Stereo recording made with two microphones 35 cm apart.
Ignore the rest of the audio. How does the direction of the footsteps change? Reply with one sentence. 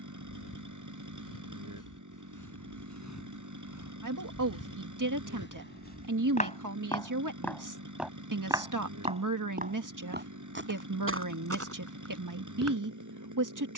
In this clip you hear the footsteps go from the left side to the right.